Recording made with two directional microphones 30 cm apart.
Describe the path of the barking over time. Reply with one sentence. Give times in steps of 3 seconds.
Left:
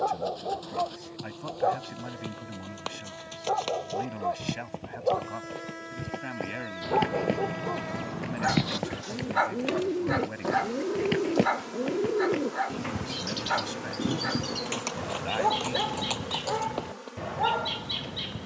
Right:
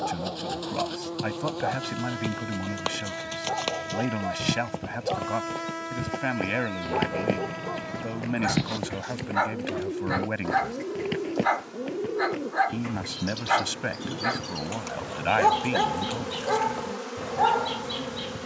In this clip you hear the barking on the left from 0 s, in the centre from 6 s and on the right from 12 s.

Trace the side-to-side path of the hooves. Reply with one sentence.
You can hear the hooves move from right to left.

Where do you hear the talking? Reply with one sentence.
In this clip you hear the talking on the right.